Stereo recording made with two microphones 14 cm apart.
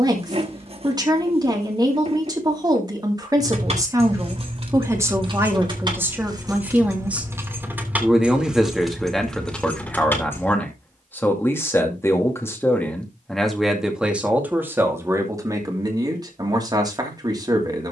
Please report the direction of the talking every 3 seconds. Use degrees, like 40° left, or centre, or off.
30° right, 20° right, 10° right, 10° left, centre, 30° right.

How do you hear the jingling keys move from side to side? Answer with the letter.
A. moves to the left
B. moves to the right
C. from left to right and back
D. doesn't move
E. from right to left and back
A.